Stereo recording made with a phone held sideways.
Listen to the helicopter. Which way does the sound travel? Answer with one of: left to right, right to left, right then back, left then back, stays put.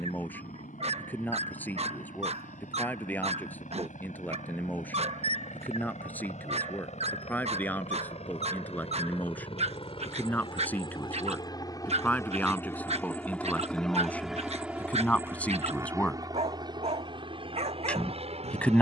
left to right.